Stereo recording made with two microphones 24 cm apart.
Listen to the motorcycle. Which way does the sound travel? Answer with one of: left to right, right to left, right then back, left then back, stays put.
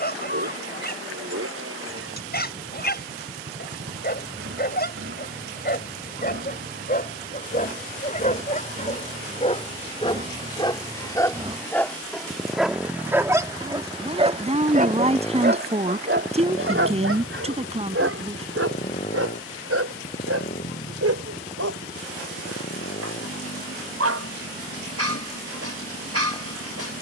right to left.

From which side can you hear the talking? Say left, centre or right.
right.